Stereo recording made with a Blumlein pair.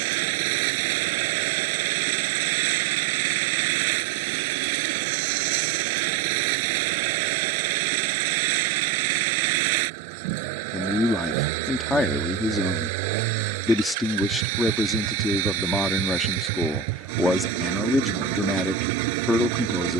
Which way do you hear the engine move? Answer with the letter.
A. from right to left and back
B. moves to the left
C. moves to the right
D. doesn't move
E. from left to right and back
D.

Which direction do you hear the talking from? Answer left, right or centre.
centre.